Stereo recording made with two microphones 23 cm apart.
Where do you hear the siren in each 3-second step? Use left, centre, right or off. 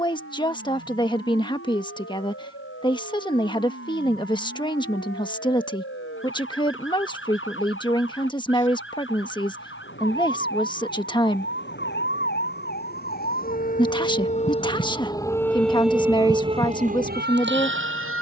left, left, left, left, left, right.